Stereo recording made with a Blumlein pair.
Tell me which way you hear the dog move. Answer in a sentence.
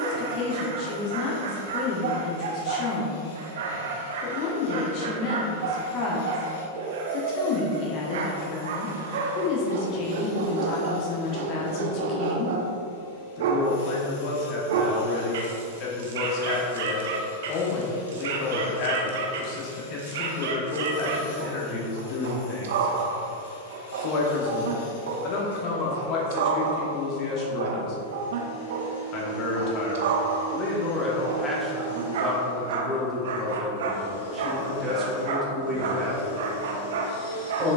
In this clip you hear the dog stay put.